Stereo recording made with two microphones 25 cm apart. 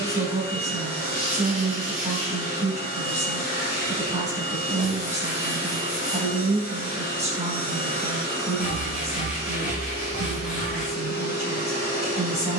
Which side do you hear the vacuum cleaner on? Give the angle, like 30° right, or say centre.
40° left.